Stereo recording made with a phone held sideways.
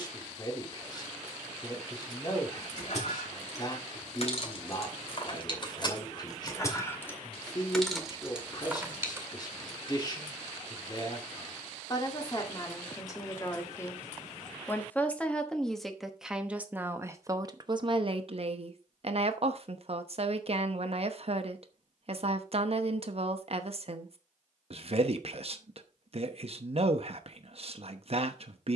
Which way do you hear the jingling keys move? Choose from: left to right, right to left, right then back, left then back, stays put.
left to right.